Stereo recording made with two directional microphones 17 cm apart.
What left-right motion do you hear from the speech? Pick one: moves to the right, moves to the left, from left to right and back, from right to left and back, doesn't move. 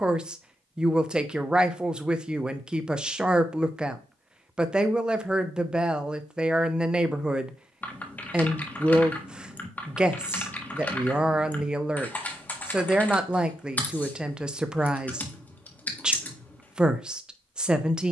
doesn't move.